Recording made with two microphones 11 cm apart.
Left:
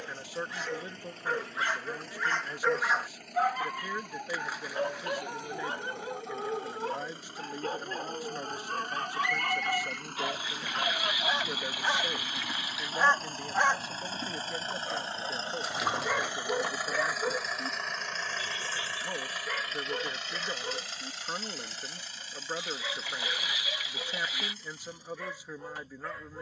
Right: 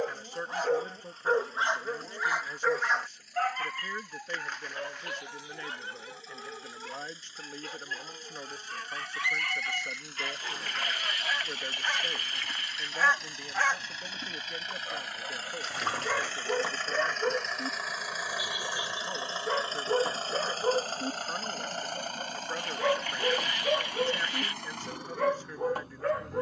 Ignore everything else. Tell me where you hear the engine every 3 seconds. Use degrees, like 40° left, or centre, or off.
70° left, 60° left, 60° left, 50° left, 40° left, 10° left, 30° right, 60° right, 70° right.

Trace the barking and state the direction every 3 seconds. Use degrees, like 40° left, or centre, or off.
30° right, 30° left, 40° left, 30° left, 20° left, 10° right, 40° right, 60° right, 60° right.